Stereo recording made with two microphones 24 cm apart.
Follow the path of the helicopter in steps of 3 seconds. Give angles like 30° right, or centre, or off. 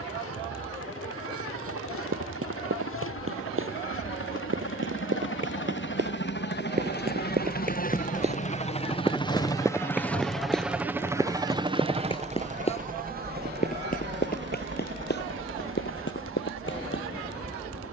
70° left, 60° left, 40° left, centre, 40° right, 60° right.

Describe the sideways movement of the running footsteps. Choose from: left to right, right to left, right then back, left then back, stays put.
right to left.